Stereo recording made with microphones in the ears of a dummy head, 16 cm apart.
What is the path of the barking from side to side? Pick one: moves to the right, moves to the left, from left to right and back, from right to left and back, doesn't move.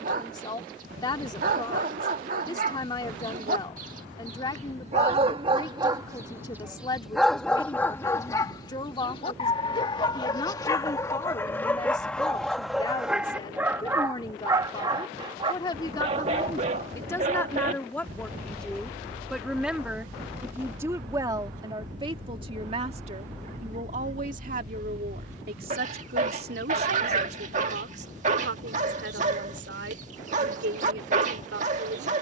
from right to left and back.